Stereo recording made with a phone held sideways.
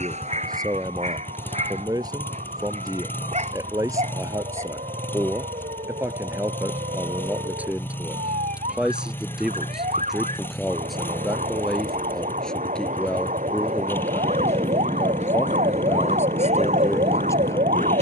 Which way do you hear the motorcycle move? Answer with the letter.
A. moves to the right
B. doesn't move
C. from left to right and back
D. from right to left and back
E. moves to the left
B.